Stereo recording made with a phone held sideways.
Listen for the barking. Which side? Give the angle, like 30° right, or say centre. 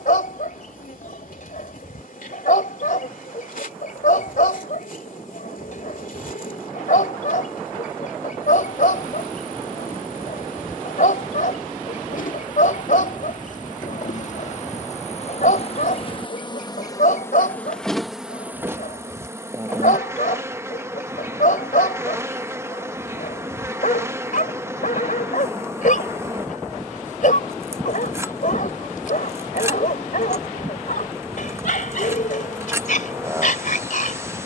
60° left.